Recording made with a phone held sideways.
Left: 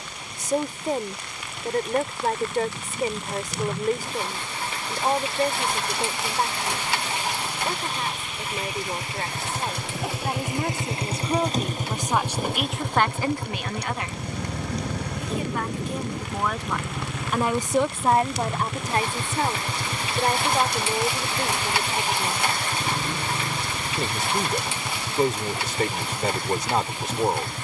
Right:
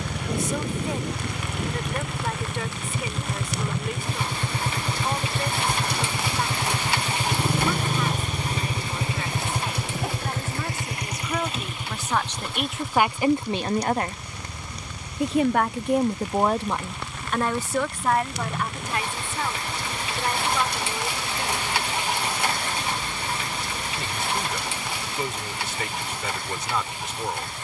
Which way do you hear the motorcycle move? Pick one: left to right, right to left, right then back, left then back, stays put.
right to left.